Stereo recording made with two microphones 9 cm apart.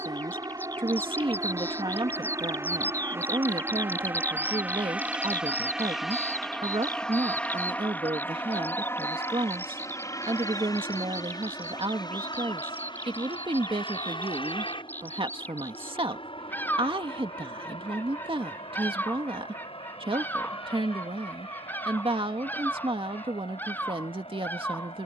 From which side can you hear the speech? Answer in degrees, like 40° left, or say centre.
70° right.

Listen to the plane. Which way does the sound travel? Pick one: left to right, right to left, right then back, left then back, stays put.
right to left.